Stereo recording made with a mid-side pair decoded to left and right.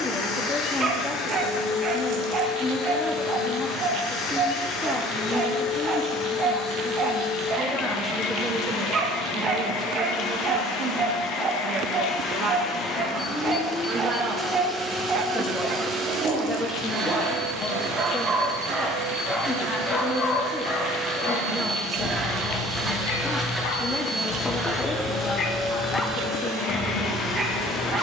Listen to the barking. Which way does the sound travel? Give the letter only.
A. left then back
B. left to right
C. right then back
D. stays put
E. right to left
A.